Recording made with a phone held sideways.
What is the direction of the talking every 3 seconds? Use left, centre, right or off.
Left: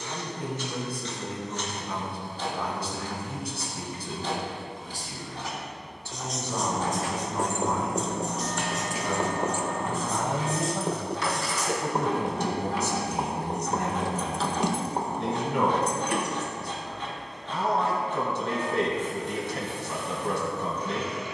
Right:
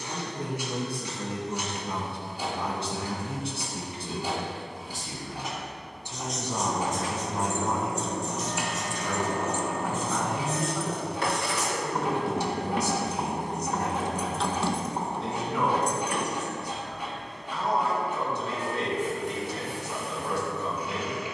right, right, centre, left, left, left, left.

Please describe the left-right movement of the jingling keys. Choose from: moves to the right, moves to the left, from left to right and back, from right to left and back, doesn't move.
from left to right and back.